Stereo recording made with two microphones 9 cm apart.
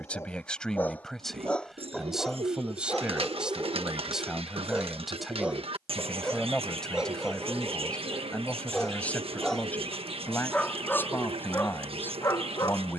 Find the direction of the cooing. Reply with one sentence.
You can hear the cooing on the right.